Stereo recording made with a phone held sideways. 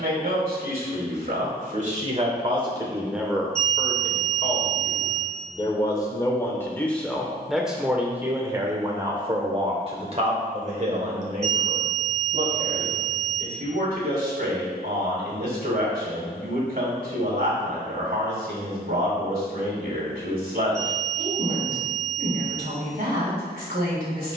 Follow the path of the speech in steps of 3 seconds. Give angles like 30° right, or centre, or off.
50° right, 20° left, centre, 40° right, 60° right, 60° right, 60° right, 60° right.